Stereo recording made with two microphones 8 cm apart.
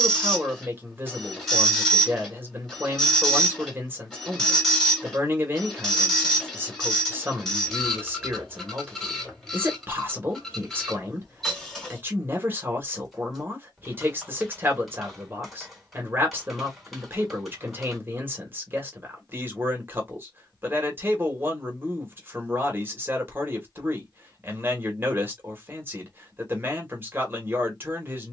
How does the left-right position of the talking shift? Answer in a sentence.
In this clip you hear the talking stay put.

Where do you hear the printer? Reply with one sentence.
You can hear the printer in the centre.